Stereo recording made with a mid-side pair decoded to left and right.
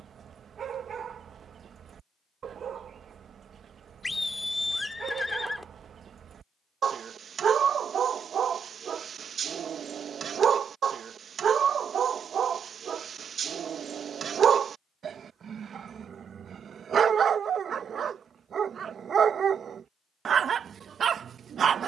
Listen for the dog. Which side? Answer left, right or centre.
right.